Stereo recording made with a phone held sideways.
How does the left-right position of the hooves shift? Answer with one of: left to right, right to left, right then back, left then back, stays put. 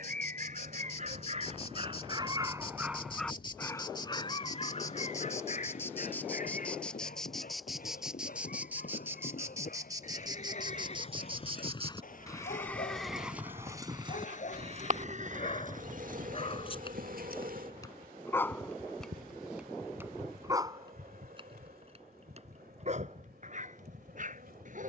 left to right.